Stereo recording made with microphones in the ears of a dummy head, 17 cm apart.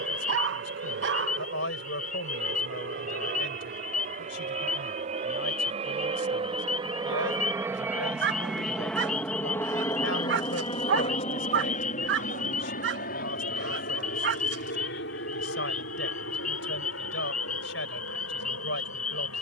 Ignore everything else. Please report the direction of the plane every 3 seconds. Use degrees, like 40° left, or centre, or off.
60° right, 40° right, 20° right, 20° left, 50° left, 60° left, 70° left.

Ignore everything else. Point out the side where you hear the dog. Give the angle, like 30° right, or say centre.
60° right.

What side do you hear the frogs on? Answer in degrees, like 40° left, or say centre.
40° left.